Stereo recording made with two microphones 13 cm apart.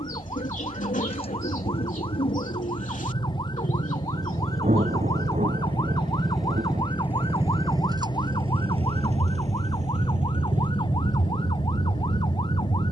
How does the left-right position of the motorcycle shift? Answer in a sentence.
You can hear the motorcycle travel towards the right.